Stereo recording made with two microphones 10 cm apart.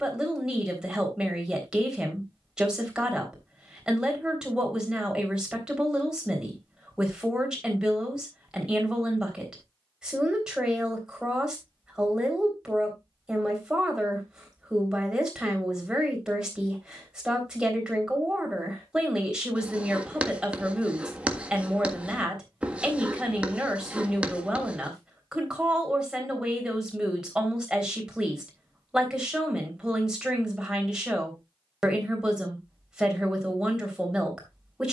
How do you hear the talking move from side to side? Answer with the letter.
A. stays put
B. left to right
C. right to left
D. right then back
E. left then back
A.